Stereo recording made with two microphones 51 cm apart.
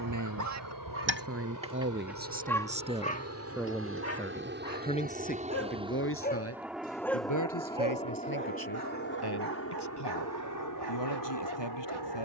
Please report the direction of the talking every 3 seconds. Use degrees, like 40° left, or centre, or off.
20° right, 10° left, 40° left, 50° left.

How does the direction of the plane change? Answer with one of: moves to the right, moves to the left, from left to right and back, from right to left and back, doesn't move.
moves to the left.